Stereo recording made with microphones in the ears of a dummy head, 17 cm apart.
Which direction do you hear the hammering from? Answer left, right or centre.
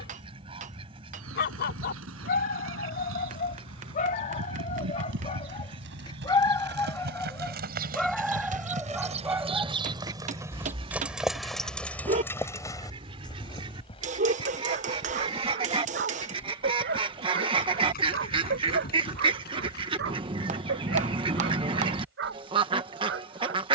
right.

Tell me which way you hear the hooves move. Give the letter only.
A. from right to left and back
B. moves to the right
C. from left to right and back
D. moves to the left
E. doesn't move
D.